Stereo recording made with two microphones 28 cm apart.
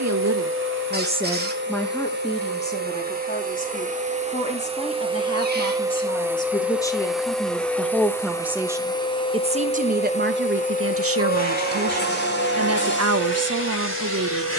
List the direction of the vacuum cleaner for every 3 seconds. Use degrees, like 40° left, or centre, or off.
40° right, 20° right, centre, 30° left, 40° left.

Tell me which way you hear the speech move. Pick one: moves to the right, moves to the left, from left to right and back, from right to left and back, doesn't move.
from right to left and back.